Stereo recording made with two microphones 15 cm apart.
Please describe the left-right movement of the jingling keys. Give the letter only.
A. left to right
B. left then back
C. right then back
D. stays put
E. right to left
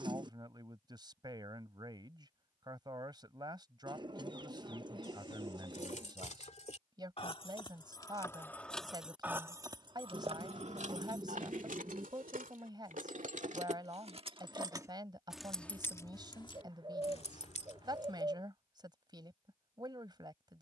C.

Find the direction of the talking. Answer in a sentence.
You can hear the talking on the right.